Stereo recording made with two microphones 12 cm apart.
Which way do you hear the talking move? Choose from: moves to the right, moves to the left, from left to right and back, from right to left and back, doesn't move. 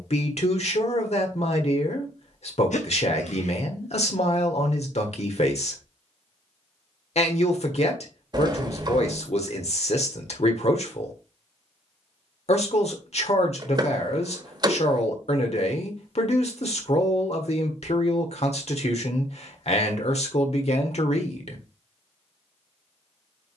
doesn't move.